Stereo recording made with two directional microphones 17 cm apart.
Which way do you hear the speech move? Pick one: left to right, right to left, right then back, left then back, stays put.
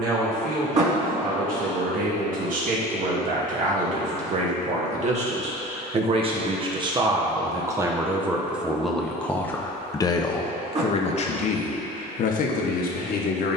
right to left.